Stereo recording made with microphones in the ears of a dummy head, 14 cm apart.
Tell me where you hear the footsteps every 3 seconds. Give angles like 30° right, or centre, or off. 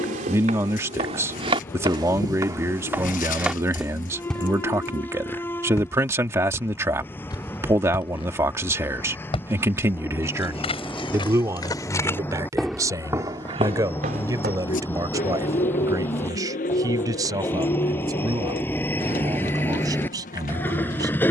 40° right, centre, 30° left, 30° left, 30° right, off, off.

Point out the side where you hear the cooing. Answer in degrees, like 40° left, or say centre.
60° left.